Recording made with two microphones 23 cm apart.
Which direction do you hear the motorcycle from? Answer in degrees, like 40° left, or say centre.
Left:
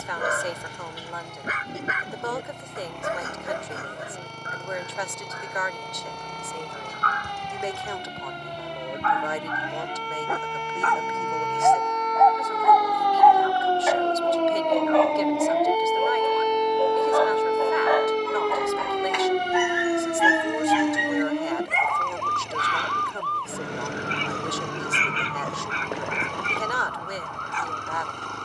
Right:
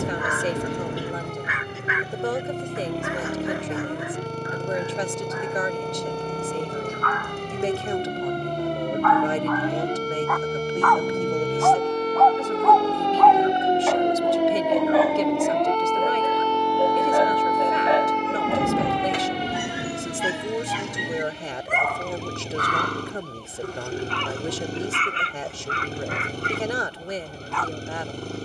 30° right.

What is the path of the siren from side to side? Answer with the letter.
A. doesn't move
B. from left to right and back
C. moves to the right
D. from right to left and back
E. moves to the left
E.